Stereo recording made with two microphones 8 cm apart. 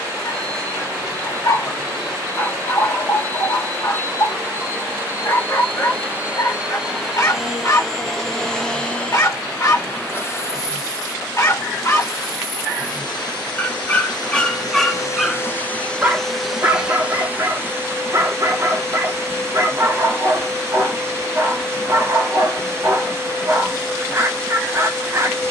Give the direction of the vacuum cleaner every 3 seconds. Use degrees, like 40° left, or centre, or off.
40° right, 30° right, centre, 30° left, 60° left, centre, 30° right, 30° right, 30° right.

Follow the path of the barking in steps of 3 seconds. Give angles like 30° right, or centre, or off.
40° left, 40° left, 40° left, 40° left, 20° left, 30° right, 40° right, 40° right, 40° right.